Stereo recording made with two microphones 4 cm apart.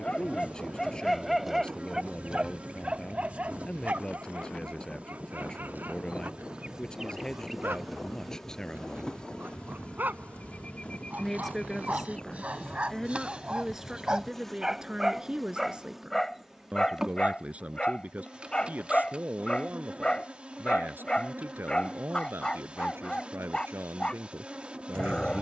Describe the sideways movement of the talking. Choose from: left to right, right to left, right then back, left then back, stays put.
left to right.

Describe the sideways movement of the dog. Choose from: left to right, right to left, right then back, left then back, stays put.
right then back.